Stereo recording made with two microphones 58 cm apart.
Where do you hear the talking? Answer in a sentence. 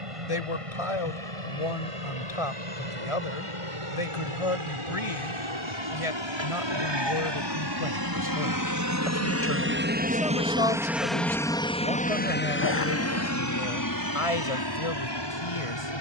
In this clip you hear the talking on the left.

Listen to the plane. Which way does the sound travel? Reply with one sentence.
In this clip you hear the plane travel towards the left.